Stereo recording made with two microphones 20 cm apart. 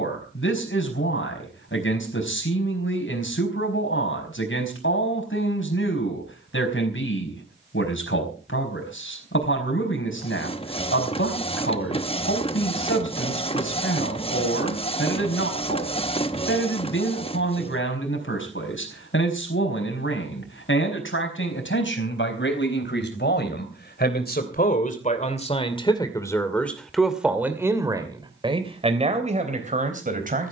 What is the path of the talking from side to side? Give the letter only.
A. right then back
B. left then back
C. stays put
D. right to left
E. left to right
E.